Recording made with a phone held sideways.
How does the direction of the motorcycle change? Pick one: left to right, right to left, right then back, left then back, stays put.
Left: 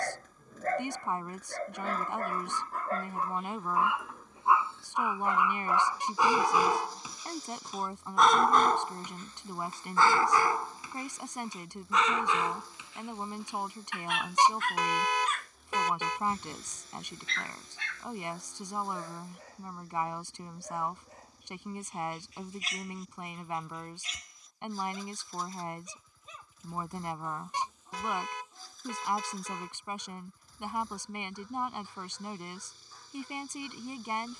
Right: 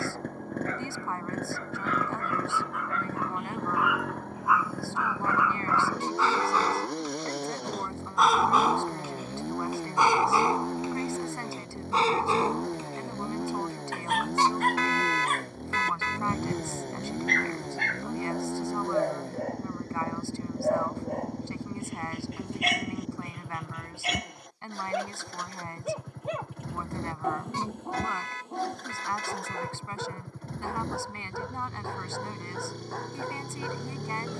stays put.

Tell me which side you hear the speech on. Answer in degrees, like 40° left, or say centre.
20° left.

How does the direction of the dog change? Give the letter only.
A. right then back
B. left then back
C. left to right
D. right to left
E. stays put
C.